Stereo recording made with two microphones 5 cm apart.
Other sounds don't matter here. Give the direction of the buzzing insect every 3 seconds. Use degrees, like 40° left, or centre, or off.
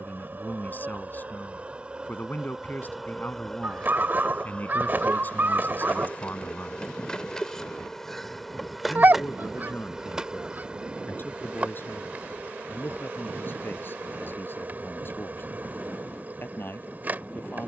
30° right, 10° left, 10° left, 20° right, 40° right, 40° right.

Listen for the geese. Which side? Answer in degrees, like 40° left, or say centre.
40° right.